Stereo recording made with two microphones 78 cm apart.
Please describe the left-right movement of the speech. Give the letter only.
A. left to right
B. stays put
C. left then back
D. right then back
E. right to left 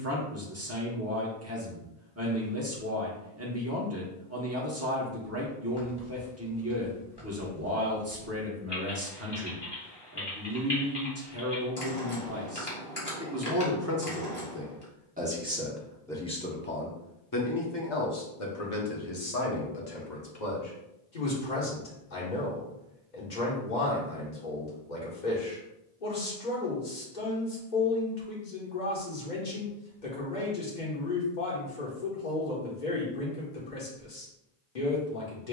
E.